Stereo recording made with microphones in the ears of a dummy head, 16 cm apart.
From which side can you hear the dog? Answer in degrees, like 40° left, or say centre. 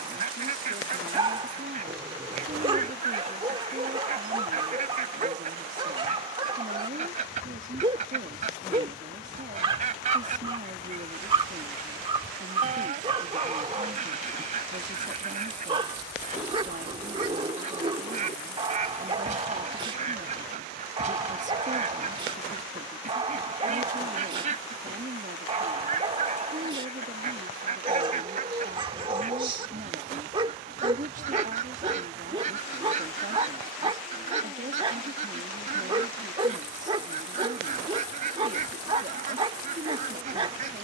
30° right.